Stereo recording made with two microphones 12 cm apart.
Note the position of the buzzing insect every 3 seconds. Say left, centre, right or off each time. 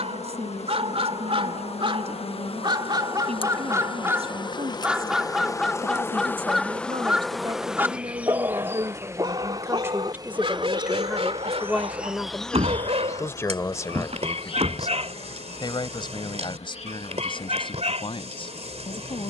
left, left, centre, right, left, left, left.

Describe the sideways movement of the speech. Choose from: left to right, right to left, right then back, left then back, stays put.
right to left.